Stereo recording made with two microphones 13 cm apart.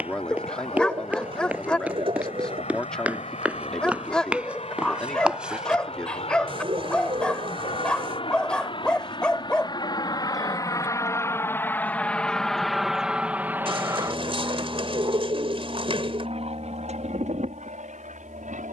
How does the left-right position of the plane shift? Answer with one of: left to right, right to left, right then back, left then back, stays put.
left to right.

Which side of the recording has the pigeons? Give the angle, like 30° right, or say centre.
40° right.